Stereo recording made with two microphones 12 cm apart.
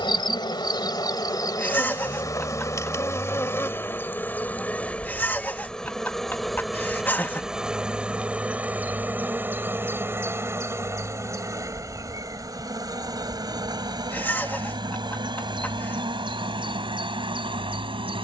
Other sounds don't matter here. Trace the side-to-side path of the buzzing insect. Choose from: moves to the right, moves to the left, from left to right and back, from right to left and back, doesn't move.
moves to the right.